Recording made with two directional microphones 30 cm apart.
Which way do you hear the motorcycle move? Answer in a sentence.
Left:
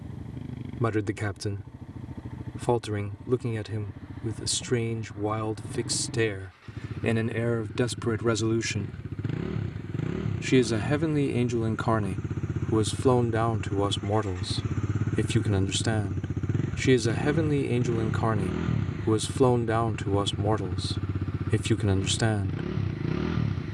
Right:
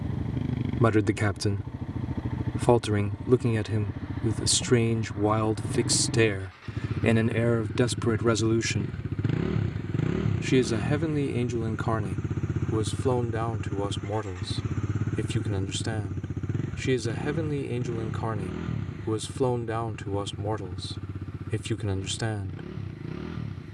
You can hear the motorcycle go from the right side to the left.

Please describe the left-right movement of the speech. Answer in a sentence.
You can hear the speech travel towards the left.